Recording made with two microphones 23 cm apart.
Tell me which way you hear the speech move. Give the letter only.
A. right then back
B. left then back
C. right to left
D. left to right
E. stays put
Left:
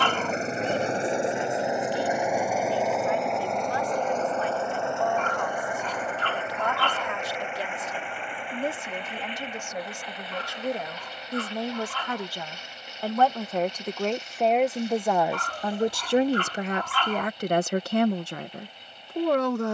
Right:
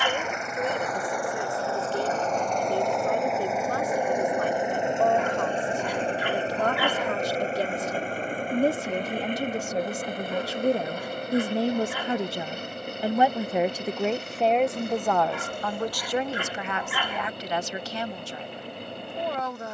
C.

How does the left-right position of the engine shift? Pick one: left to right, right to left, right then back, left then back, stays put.
left to right.